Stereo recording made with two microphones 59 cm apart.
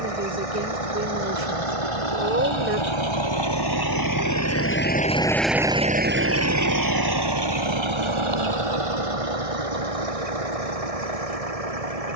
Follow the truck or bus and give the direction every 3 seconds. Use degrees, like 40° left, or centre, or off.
60° left, 20° left, 40° right, 70° right.